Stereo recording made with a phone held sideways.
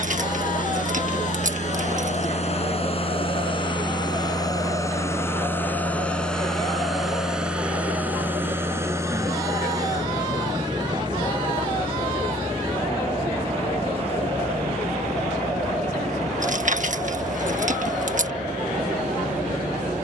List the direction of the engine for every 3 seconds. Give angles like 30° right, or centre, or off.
50° left, 20° left, 10° right, 30° right, 40° right, 40° right, 50° right.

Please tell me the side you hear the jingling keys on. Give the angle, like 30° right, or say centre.
50° right.